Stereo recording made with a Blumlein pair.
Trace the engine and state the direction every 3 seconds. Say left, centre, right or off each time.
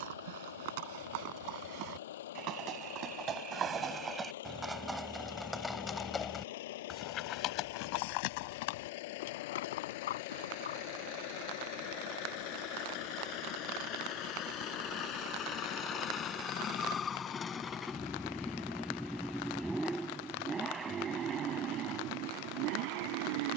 left, left, left, left, left, left, centre, right.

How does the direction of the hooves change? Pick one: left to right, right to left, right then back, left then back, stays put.
right to left.